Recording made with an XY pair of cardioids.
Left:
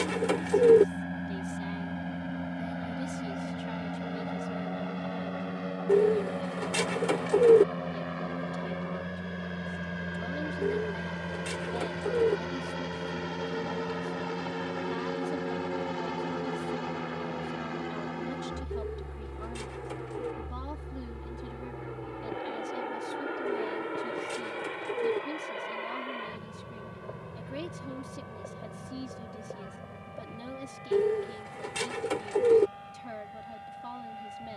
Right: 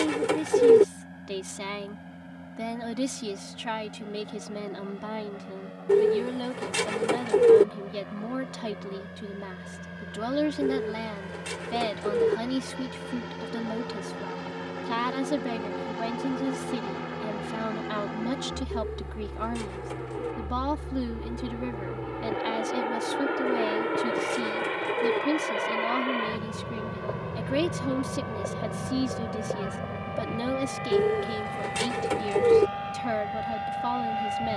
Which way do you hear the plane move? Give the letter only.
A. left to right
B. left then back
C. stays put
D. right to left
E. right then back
A.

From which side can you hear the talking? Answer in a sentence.
You can hear the talking on the right.